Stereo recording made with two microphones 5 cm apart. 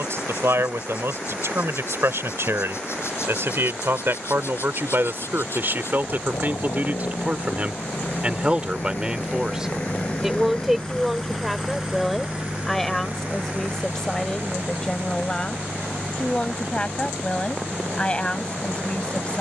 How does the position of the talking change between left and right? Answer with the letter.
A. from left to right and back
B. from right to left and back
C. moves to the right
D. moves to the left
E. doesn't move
D.